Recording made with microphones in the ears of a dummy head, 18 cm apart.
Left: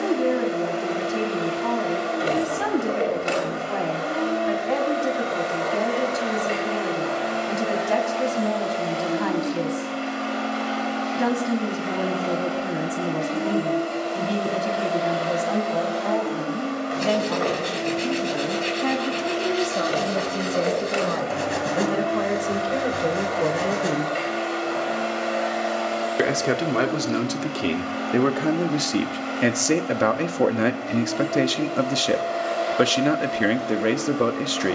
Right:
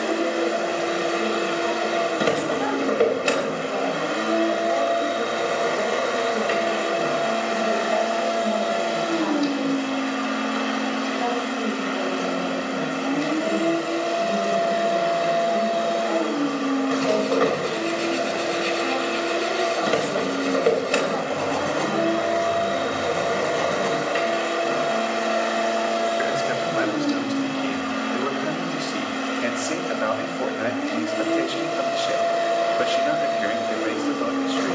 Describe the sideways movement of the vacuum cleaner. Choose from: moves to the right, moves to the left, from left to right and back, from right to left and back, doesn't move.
doesn't move.